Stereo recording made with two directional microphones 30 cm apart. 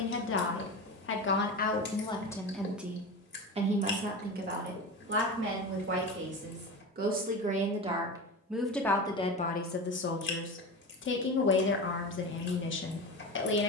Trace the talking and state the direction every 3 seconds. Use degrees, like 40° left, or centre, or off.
20° left, 30° right, 20° right, 30° left, 40° left.